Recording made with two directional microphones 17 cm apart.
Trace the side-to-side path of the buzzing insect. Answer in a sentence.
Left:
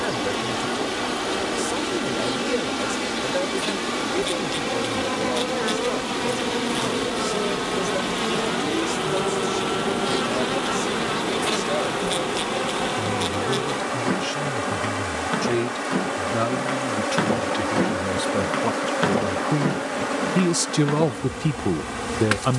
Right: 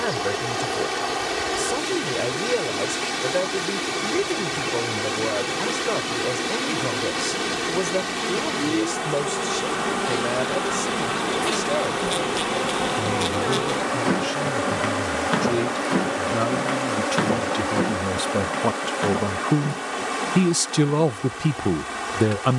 In this clip you hear the buzzing insect move from left to right and back again.